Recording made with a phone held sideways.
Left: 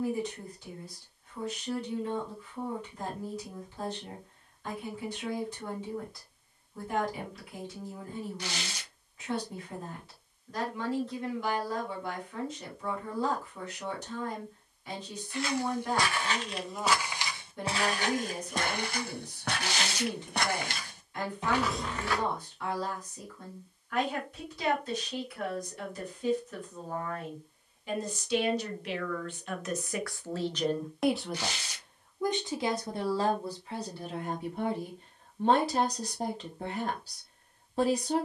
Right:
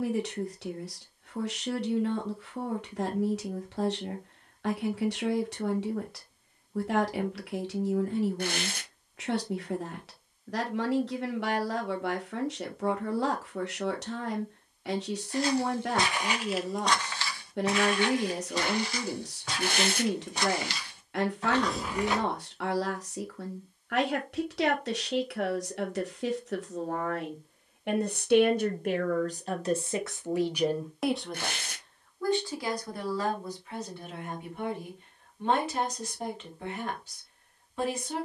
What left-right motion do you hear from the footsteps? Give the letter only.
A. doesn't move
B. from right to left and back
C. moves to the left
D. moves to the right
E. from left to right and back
B.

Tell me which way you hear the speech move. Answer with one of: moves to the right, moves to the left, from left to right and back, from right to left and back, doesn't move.
moves to the left.